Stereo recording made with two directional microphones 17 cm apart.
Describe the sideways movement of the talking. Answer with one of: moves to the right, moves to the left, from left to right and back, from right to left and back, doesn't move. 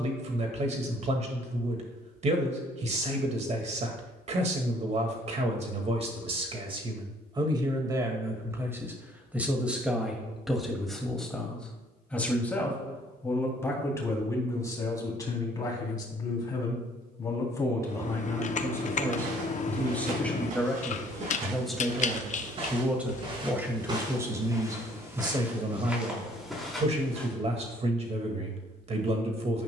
from right to left and back.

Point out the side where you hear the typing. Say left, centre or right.
left.